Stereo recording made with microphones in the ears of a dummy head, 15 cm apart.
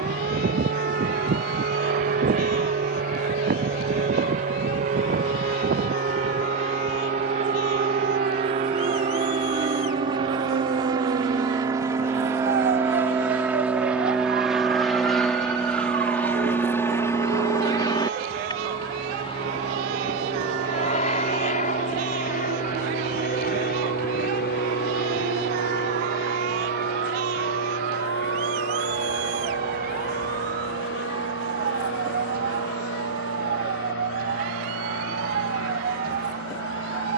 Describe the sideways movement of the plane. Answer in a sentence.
In this clip you hear the plane go from the right side to the left.